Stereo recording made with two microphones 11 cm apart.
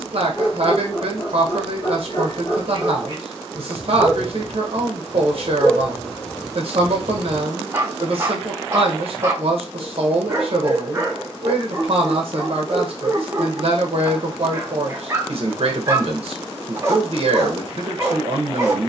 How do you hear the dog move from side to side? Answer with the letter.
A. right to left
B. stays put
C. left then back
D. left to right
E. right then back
D.